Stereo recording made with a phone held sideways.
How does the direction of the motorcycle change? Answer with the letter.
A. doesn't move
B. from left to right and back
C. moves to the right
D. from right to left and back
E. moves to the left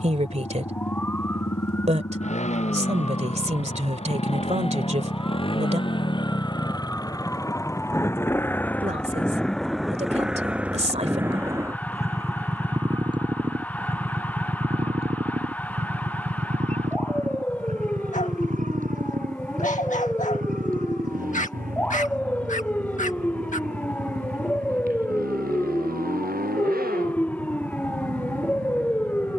C.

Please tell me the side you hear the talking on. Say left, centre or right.
right.